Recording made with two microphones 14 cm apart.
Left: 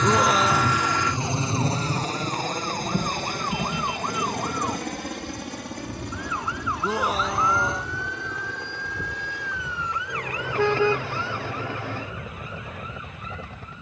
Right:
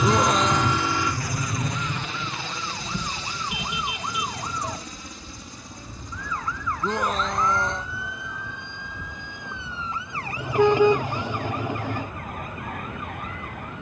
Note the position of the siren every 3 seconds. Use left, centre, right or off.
left, left, centre, right, right.